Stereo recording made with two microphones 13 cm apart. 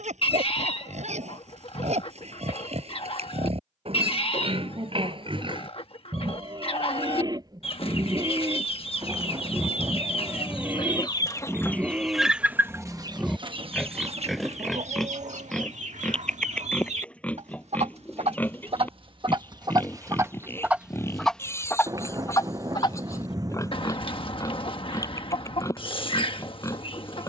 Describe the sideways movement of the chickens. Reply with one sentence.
In this clip you hear the chickens move from left to right and back again.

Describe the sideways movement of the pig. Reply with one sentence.
In this clip you hear the pig travel towards the left.